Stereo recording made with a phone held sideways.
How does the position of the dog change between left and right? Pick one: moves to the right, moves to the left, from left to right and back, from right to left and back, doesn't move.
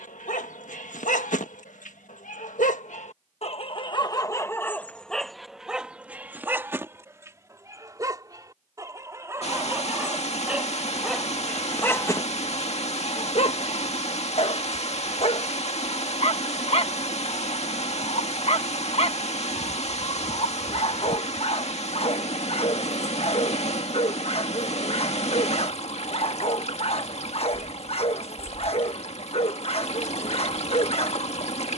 from left to right and back.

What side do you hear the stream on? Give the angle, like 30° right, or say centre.
50° left.